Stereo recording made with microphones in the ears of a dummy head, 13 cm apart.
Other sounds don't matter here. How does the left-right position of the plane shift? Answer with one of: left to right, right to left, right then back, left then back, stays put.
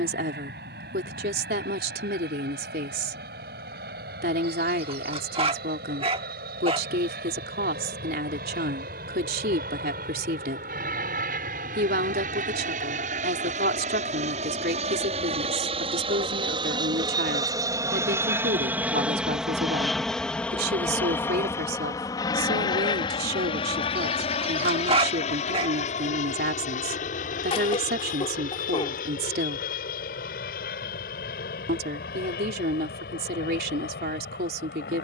right to left.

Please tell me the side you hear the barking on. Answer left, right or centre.
right.